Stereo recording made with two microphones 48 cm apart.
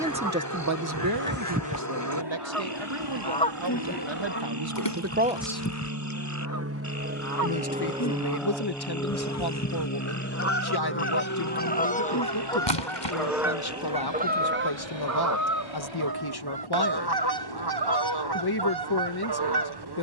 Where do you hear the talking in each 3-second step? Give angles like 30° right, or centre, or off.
50° right, 50° right, 50° left, 50° left, 50° left, 50° left, 50° left.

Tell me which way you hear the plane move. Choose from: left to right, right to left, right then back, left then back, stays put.
right to left.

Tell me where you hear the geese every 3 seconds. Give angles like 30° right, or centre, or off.
20° right, 20° left, 40° left, 30° left, 10° right, 50° right, 50° right.